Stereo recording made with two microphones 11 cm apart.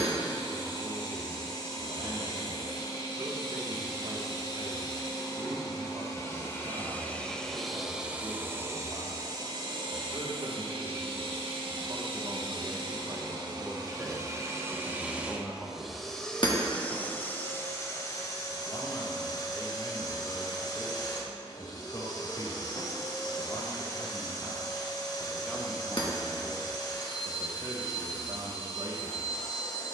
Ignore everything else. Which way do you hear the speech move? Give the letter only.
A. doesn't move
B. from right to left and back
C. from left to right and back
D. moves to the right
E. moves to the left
B.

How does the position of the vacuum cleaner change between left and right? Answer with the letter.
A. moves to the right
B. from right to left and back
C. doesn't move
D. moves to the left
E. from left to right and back
E.